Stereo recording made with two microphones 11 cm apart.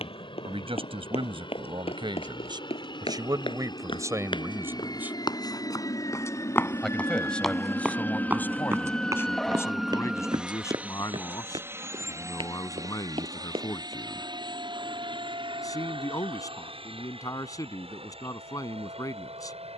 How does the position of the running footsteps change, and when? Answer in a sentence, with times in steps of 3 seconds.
In this clip you hear the running footsteps on the left from 0 s, in the centre from 6 s, on the right from 9 s and not at all from 15 s.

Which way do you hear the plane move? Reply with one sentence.
You can hear the plane go from the left side to the right.